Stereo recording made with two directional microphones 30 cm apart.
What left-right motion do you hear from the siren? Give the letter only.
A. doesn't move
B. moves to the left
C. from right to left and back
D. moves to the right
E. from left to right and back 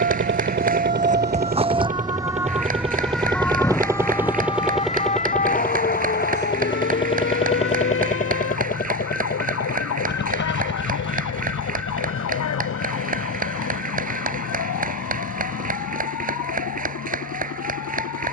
B.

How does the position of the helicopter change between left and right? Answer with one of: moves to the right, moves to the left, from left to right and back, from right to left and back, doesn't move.
moves to the left.